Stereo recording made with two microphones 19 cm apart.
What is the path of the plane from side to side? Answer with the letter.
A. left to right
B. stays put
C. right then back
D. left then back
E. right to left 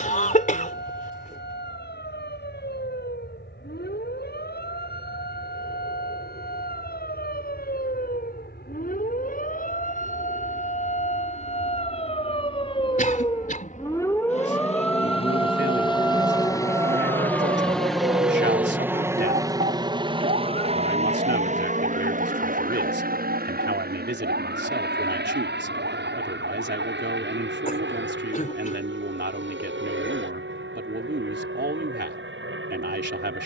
A.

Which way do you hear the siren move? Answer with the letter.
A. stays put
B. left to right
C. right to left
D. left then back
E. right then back
B.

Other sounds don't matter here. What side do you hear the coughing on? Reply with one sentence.
You can hear the coughing on the left.